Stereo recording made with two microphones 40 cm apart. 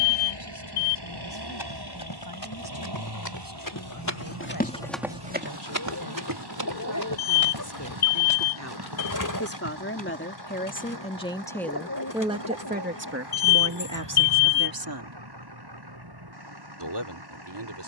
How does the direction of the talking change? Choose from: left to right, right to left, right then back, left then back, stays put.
left to right.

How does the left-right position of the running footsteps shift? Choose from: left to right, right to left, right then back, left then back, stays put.
left to right.